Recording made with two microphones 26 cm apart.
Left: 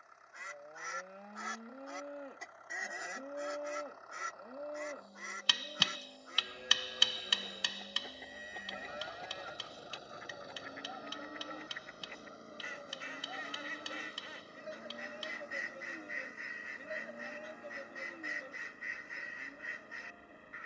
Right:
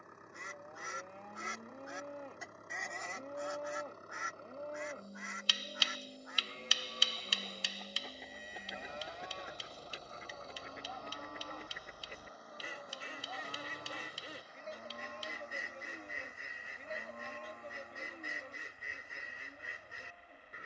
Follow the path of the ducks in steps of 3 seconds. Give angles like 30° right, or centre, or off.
20° right, 30° left, 10° left, 30° right, 40° right, 40° right, 40° right.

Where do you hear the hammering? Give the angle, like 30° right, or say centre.
70° left.